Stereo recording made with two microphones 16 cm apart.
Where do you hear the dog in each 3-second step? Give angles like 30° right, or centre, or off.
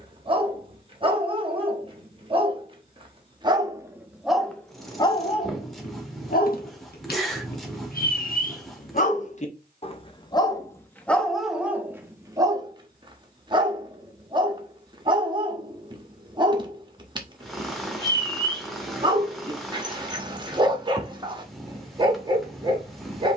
30° right, 10° left, 60° left, 20° left, 30° right, 30° right, 30° right, 30° right.